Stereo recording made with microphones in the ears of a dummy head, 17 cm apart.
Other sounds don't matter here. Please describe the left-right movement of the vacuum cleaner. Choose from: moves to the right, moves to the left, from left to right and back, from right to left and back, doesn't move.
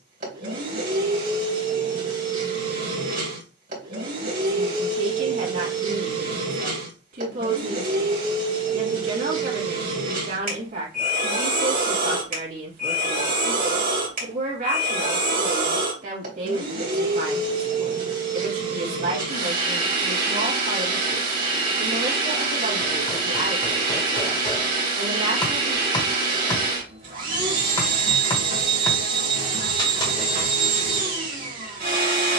doesn't move.